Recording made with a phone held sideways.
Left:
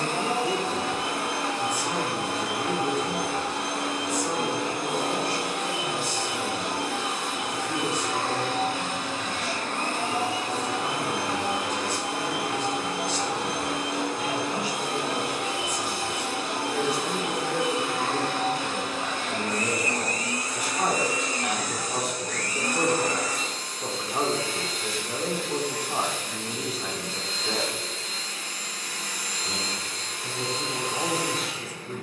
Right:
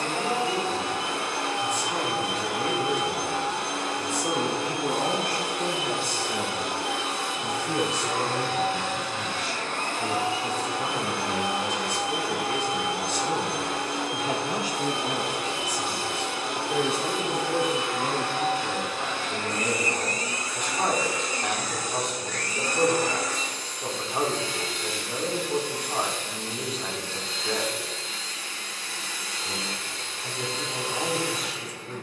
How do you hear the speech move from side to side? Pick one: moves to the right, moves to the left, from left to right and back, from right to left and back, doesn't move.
from left to right and back.